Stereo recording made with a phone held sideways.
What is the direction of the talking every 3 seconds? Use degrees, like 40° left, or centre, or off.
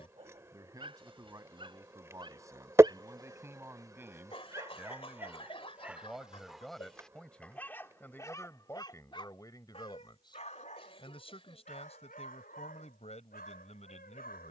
20° right, 10° right, 10° left, 30° left, 50° left.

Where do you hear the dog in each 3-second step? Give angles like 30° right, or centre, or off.
30° right, 20° right, 10° left, 50° left, 70° left.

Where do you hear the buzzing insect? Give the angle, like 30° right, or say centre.
20° right.